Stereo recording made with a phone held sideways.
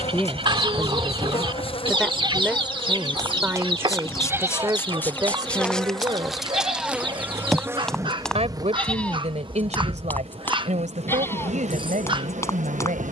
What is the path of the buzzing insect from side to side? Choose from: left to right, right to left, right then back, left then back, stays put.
left to right.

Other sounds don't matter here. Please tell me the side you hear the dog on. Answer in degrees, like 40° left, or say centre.
30° right.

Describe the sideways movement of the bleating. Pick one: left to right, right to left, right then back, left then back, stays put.
right to left.